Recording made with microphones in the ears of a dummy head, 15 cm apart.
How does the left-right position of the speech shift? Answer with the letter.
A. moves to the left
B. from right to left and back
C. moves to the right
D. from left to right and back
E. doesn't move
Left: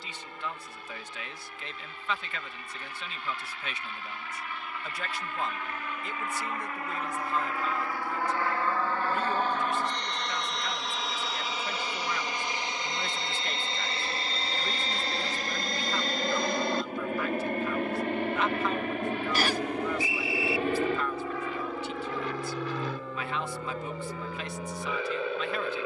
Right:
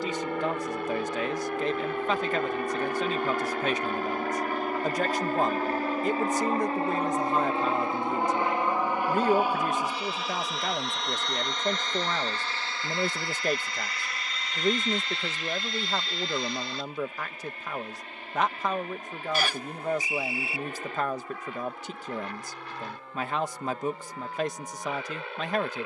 E.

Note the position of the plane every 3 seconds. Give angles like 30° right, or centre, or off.
50° right, 40° right, 20° right, centre, 20° left, 40° left, 50° left, 60° left, 60° left.